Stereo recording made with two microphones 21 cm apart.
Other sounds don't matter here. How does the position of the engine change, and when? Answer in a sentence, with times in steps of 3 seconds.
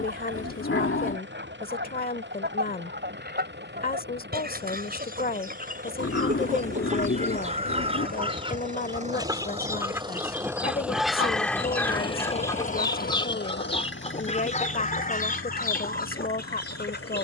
In this clip you hear the engine on the right from 0 s, in the centre from 9 s and on the left from 12 s.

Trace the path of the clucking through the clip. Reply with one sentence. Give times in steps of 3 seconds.
You can hear the clucking on the right from 0 s, in the centre from 9 s and on the left from 12 s.